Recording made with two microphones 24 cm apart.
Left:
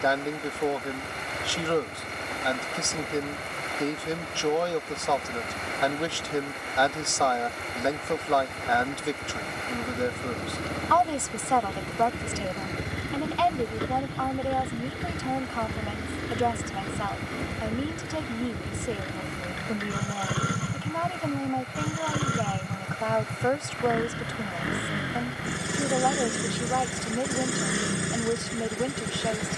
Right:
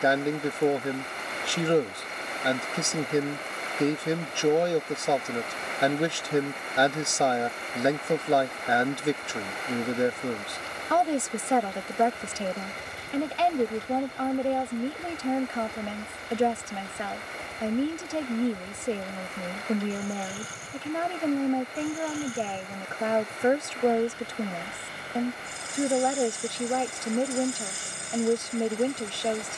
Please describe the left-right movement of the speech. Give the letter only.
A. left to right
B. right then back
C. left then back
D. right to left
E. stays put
E.